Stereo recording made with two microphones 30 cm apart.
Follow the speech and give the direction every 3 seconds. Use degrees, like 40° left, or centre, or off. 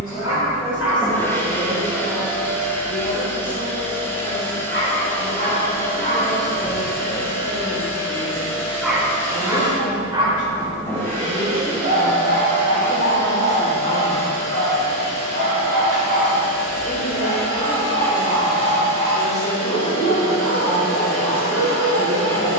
30° left, 30° left, 30° left, 30° left, 20° left, 10° right, centre, 20° left.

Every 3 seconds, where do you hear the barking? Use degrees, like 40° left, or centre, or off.
60° left, 40° left, 20° left, 20° right, 40° right, 50° right, 50° right, 60° right.